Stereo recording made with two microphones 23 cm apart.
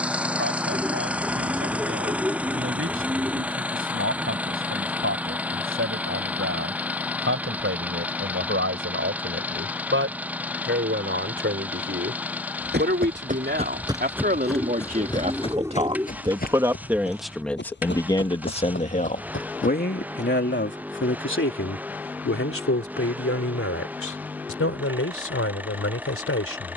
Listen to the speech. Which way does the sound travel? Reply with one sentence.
In this clip you hear the speech move from right to left.